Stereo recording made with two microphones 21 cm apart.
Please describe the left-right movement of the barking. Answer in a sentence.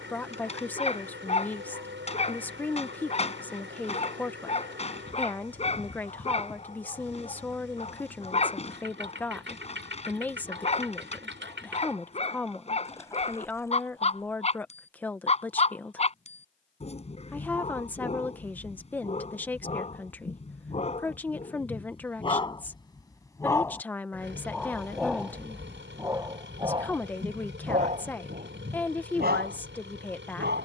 You can hear the barking travel towards the right.